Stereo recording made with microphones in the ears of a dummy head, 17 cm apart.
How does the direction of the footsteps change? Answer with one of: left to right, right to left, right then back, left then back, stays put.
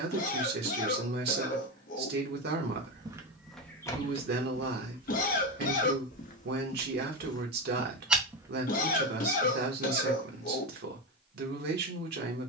left then back.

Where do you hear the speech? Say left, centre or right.
right.